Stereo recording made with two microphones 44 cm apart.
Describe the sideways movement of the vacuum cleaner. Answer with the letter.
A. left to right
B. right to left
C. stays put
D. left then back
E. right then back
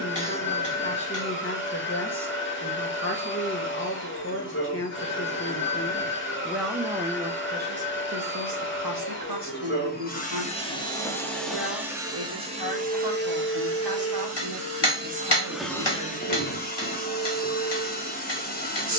E.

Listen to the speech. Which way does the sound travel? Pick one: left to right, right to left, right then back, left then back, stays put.
left to right.